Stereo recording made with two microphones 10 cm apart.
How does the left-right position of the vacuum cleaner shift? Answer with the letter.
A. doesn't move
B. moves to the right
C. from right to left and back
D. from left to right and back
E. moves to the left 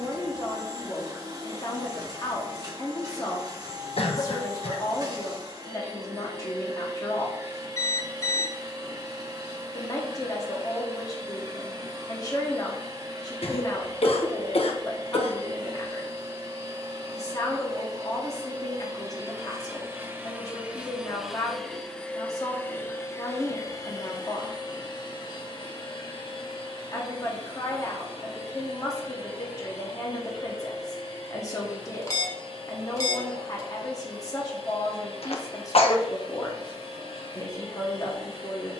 E.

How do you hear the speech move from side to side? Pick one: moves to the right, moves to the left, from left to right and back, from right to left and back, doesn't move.
doesn't move.